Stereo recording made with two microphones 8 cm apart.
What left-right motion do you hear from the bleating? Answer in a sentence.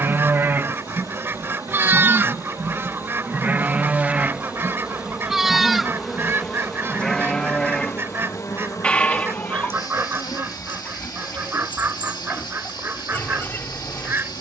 You can hear the bleating move to the left.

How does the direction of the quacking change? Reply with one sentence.
In this clip you hear the quacking stay put.